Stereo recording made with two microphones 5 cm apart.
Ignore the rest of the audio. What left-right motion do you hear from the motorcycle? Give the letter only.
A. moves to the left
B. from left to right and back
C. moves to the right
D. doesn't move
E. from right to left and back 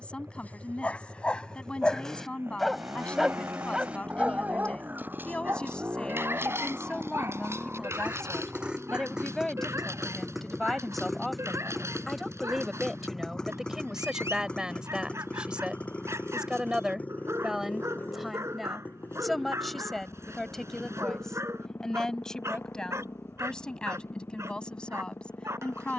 A.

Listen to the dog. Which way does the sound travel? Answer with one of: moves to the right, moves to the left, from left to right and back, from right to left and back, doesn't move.
moves to the right.